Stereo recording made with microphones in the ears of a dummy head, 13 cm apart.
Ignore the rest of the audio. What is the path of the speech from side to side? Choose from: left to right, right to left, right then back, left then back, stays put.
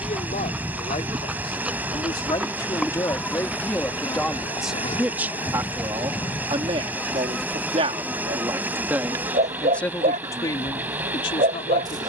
right then back.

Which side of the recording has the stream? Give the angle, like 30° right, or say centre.
10° right.